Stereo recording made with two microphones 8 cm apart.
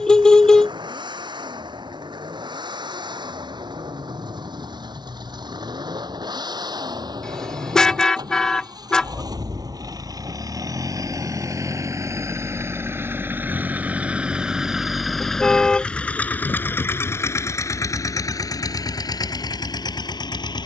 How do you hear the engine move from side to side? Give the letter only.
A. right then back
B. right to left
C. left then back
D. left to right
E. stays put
B.